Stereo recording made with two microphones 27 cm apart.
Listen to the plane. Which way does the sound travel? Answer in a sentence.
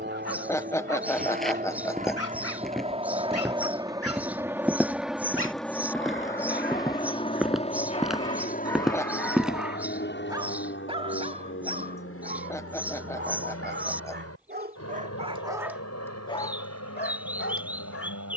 In this clip you hear the plane travel towards the left.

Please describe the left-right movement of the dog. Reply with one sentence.
In this clip you hear the dog go right and come back.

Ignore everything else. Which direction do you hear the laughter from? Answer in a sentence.
In this clip you hear the laughter in the centre.